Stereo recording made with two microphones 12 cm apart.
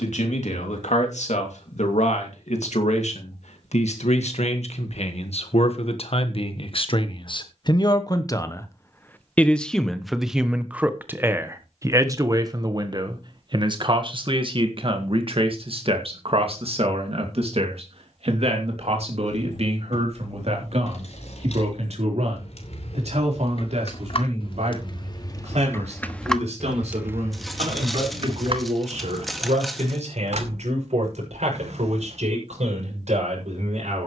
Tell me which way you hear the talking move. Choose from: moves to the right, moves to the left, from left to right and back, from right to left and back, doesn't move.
moves to the right.